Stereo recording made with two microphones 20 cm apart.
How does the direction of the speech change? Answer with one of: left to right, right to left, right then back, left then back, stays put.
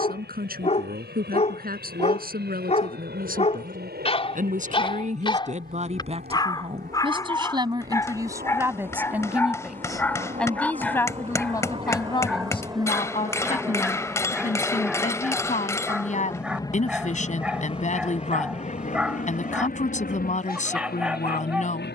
right to left.